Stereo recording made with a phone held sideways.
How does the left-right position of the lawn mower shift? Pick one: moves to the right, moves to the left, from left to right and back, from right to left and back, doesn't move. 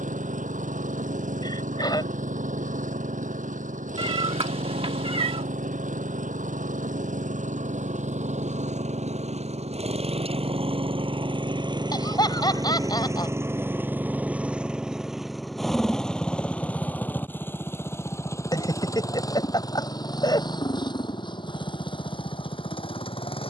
moves to the left.